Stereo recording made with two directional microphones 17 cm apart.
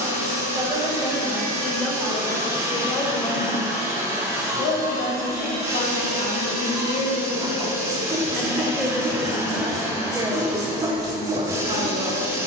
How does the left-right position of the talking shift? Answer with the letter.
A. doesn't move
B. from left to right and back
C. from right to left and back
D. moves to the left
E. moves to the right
C.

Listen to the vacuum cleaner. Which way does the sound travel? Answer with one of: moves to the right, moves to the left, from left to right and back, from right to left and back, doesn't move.
doesn't move.